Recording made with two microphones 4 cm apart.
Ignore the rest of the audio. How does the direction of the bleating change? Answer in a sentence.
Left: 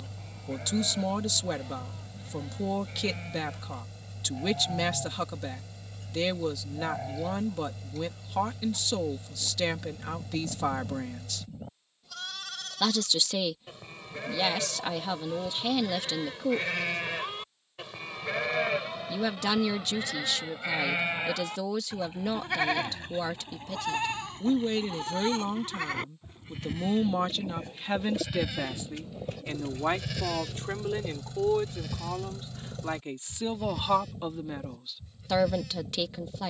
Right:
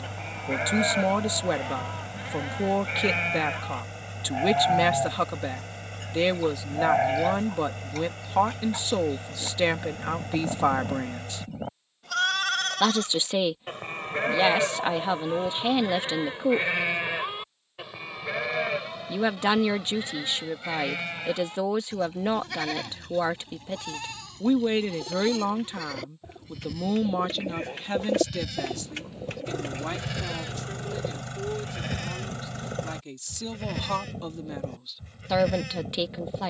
You can hear the bleating move from right to left and back again.